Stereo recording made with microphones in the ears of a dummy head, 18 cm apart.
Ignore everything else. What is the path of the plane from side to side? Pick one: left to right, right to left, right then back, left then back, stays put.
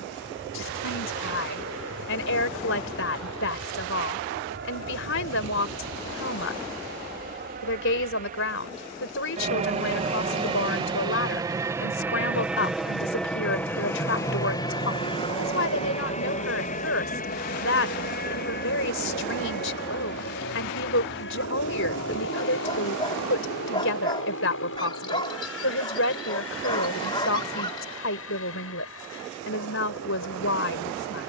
right to left.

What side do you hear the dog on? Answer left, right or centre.
left.